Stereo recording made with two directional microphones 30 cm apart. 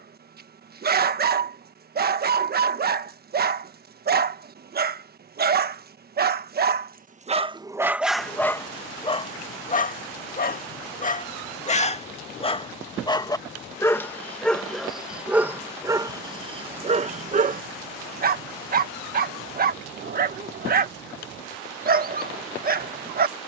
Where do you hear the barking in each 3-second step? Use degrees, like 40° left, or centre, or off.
30° right, 30° right, 10° right, 20° left, 10° left, 20° right, 30° right, 30° right.